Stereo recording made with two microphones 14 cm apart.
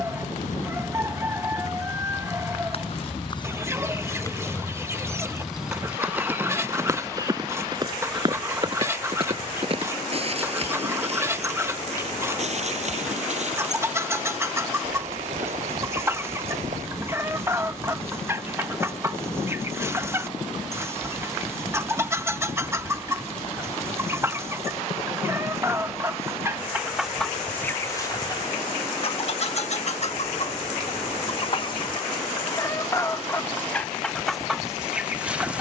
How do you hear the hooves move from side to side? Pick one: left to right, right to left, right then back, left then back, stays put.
left to right.